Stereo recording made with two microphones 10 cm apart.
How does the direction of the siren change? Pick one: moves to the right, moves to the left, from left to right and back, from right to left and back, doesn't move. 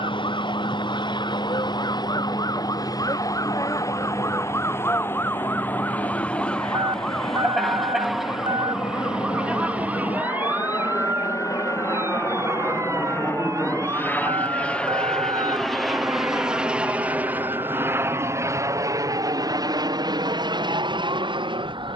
moves to the right.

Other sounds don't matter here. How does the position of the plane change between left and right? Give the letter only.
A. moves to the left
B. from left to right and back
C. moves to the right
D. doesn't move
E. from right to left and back
C.